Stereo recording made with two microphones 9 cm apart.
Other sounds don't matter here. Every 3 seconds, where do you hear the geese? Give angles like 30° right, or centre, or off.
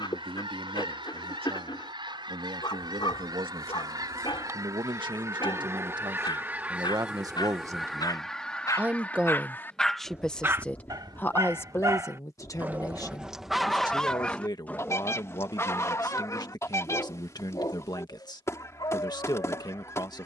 60° right, 40° right, centre, 30° left, 30° left, 30° left, 30° left.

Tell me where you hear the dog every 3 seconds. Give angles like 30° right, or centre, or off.
60° left, 60° left, 50° left, 20° right, centre, 40° left, 50° left.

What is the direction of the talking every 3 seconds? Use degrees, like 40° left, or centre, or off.
70° right, 60° right, 40° right, 10° left, 40° left, 50° left, 50° left.